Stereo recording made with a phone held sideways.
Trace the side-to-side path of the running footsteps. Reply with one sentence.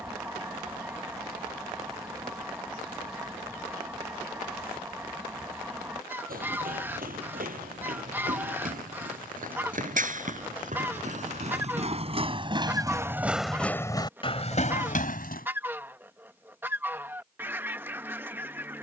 You can hear the running footsteps go from the right side to the left.